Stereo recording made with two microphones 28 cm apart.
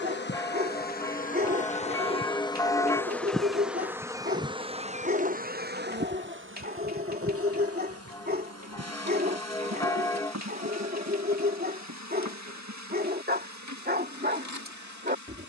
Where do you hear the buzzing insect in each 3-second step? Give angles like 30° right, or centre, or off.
30° left, 20° right, 60° right, 70° right, 80° right.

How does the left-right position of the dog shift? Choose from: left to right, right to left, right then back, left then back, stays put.
stays put.